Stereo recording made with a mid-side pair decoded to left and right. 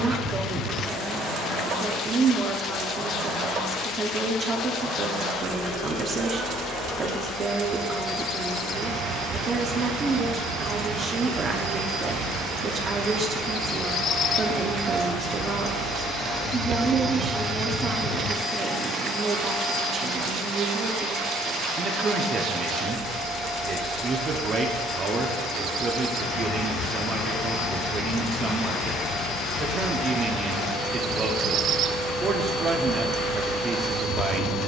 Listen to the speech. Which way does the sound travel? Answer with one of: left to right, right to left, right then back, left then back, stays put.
stays put.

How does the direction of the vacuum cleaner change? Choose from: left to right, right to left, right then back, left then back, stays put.
right to left.